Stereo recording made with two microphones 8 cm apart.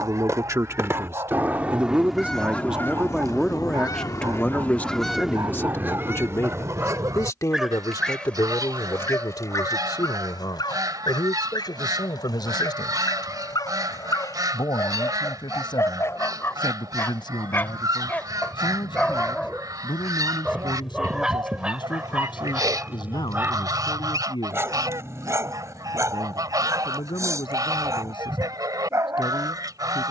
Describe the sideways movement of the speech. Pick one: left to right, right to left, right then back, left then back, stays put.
right to left.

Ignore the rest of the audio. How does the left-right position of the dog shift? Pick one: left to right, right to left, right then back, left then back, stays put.
left then back.